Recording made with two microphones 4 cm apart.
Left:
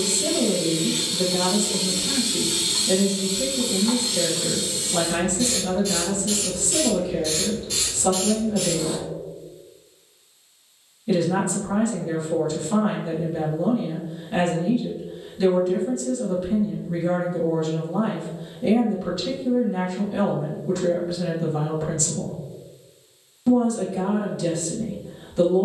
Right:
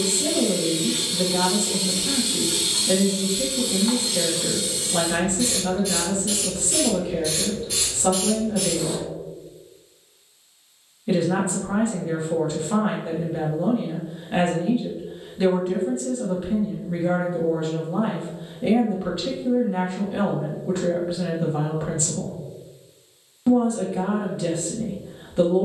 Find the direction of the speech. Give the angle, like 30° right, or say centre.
20° right.